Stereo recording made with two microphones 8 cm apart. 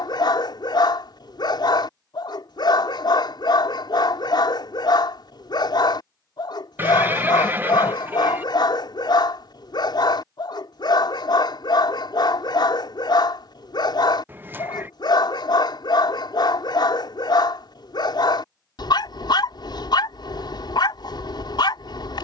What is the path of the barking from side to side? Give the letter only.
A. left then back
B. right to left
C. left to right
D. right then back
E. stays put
E.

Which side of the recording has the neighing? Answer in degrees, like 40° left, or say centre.
30° right.